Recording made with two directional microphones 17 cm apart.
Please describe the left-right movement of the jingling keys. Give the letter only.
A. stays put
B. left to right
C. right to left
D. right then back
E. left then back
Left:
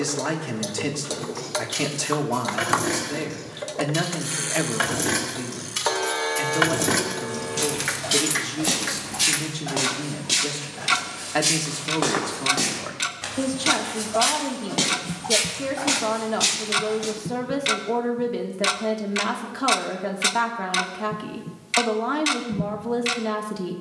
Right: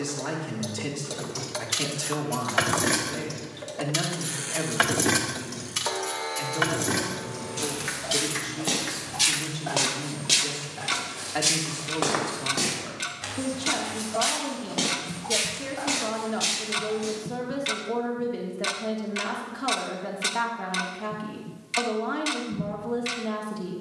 C.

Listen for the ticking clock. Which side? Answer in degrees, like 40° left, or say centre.
30° left.